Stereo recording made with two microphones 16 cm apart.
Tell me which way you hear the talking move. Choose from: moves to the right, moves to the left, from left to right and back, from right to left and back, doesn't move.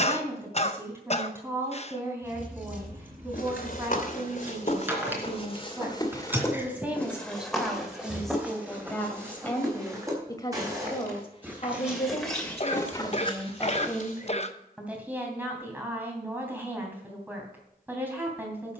from right to left and back.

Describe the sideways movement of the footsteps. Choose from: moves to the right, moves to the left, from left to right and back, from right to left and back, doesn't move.
from left to right and back.